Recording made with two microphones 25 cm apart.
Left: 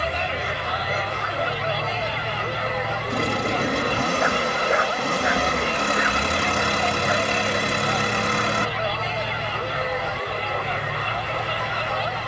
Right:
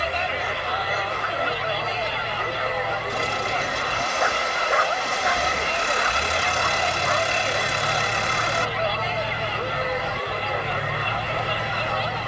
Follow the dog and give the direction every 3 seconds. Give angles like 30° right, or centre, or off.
30° left, 20° left, 10° left, 10° right.